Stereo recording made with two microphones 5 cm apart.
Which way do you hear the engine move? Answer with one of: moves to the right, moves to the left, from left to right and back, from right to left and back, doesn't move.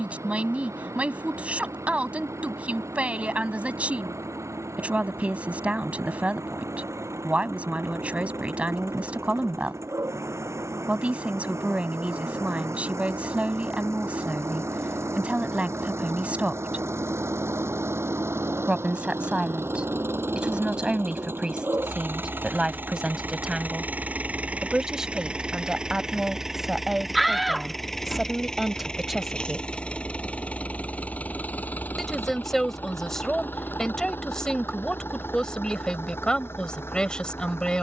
moves to the left.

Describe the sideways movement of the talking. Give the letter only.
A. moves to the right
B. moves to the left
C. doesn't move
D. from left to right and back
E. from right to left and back
B.